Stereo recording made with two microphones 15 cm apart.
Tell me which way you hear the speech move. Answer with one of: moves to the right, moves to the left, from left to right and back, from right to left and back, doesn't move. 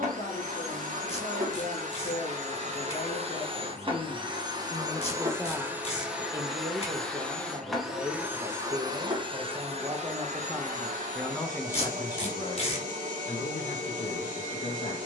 from left to right and back.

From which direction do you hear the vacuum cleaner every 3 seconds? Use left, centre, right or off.
right, right, centre, right, right.